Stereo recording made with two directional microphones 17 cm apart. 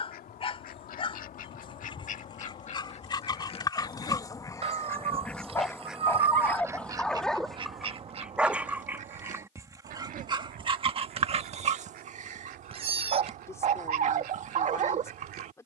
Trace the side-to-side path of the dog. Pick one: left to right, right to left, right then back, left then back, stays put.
left to right.